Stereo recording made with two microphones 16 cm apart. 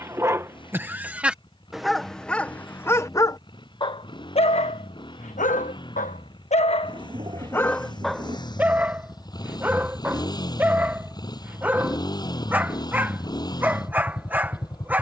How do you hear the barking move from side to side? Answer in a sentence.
You can hear the barking go left and come back.